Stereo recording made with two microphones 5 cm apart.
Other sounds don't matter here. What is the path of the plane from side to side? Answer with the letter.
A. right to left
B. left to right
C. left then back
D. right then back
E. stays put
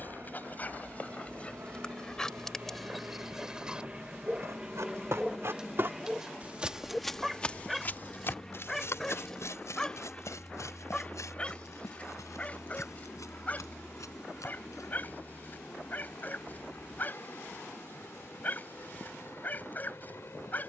A.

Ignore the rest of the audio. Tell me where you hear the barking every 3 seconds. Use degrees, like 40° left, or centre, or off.
20° left, 10° right, centre, 20° left, 30° left, 30° left, 30° left.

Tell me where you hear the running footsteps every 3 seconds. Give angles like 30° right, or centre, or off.
off, 60° right, 20° left, 70° left, 80° left, off, off.